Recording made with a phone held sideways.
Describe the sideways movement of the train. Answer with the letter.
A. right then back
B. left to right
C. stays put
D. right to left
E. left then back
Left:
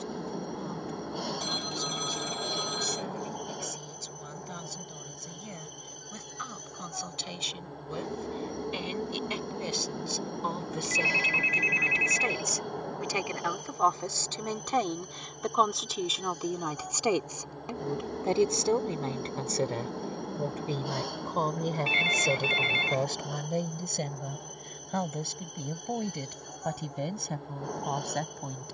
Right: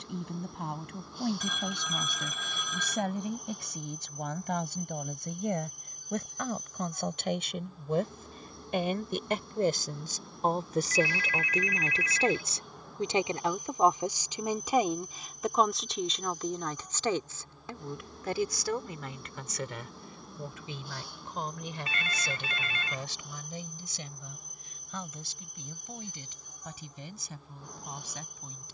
C.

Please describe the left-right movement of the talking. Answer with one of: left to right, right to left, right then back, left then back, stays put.
right to left.